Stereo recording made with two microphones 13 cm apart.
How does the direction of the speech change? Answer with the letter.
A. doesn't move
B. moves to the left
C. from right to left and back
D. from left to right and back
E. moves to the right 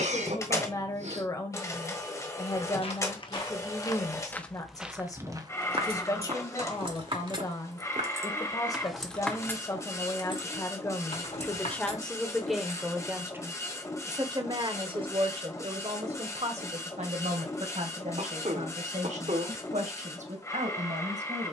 E.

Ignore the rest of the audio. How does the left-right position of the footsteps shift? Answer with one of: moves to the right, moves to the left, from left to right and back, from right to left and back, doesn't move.
moves to the right.